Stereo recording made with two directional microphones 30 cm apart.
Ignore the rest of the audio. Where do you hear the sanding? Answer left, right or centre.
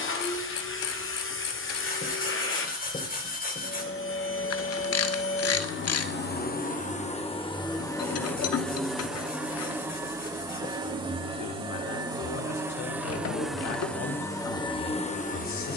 left.